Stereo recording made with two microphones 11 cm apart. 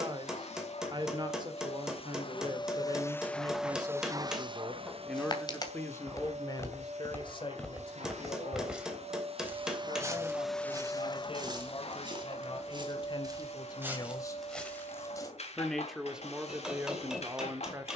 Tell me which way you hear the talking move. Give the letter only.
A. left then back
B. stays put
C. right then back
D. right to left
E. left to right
A.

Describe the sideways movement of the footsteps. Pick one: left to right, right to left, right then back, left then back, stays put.
right then back.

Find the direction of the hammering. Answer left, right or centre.
centre.